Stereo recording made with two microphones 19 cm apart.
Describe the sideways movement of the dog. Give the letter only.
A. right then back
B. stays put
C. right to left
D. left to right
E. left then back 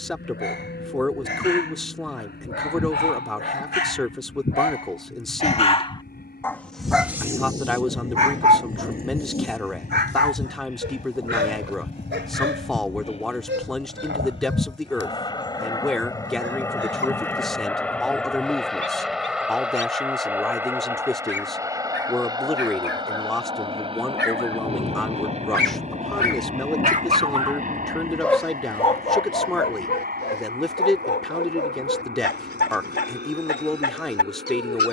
A.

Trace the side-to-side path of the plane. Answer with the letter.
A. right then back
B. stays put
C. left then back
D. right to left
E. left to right
E.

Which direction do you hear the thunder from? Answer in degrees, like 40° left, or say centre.
40° left.